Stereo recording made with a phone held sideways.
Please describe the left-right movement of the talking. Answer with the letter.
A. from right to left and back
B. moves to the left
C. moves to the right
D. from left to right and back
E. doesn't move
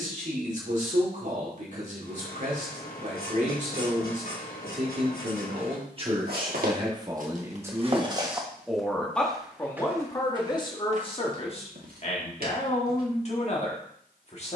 B.